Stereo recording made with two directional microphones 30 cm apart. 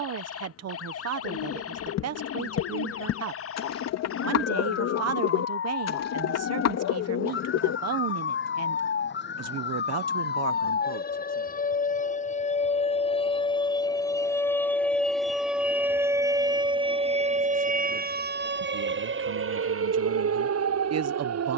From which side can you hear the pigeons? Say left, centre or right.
left.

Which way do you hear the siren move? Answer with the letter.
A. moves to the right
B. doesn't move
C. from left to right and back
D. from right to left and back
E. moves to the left
A.